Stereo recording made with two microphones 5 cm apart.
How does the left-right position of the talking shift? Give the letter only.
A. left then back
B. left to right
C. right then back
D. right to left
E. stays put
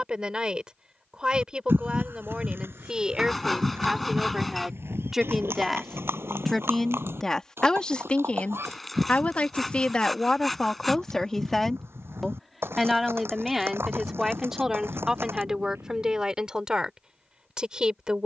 A.